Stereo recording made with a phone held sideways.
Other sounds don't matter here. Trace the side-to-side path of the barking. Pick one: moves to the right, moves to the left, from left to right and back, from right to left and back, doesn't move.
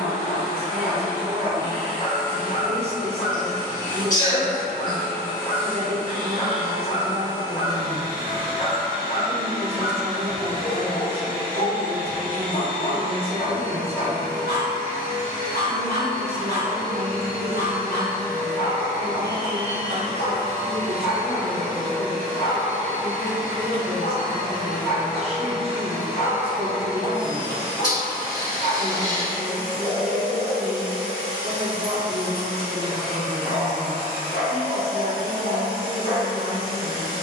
doesn't move.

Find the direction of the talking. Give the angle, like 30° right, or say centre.
40° right.